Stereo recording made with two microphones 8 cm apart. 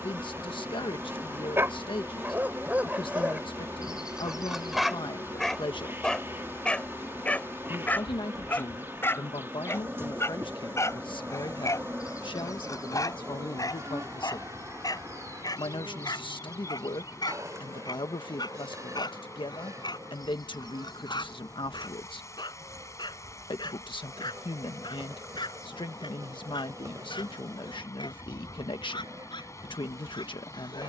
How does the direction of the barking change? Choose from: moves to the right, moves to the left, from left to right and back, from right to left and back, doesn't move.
moves to the left.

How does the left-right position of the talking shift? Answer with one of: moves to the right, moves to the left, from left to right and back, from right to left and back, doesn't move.
doesn't move.